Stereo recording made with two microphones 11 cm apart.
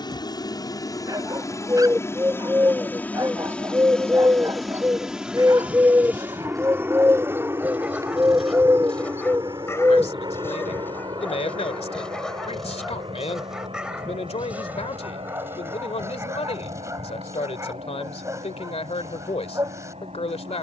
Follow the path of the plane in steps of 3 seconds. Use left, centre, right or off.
left, centre, right, right, right, right, right.